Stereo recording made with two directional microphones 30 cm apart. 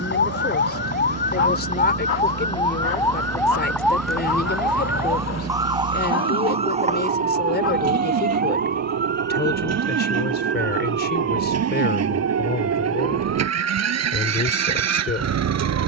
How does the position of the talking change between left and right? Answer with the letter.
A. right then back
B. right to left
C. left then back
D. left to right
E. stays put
E.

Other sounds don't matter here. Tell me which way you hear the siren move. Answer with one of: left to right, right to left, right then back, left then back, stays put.
left to right.